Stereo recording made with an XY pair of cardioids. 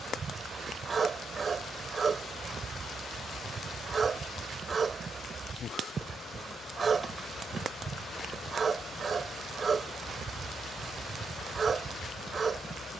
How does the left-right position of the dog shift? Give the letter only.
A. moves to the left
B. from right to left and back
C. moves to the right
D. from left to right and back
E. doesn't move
E.